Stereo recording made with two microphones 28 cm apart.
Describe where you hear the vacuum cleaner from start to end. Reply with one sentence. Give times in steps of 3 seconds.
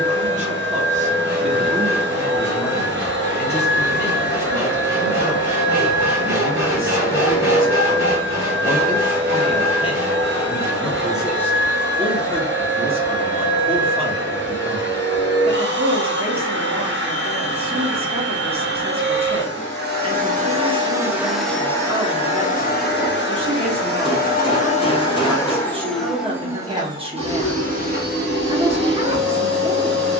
In this clip you hear the vacuum cleaner on the right from 0 s, on the left from 21 s, in the centre from 24 s and on the right from 27 s.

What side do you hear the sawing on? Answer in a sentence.
You can hear the sawing in the centre.